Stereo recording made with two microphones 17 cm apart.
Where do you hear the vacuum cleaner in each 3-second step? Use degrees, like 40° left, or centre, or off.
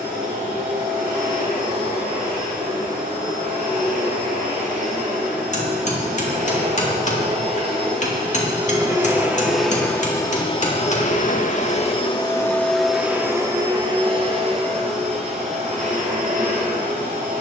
50° right, 50° right, 40° right, 20° left, 10° right, 50° right.